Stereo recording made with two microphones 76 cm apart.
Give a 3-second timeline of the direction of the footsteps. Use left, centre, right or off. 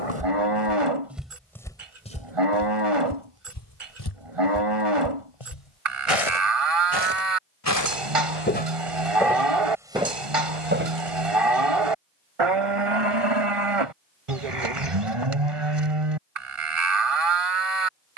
centre, left, left, centre, off, off.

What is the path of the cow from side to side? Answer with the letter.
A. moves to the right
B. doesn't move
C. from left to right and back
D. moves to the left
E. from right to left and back
B.